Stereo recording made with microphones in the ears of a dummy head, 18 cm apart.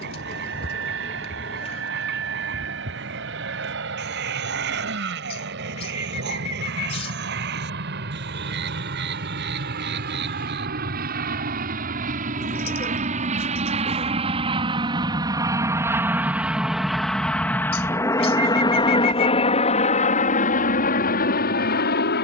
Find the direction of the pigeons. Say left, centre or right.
left.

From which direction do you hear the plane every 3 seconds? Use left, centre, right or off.
right, right, right, right, right, centre, left, left.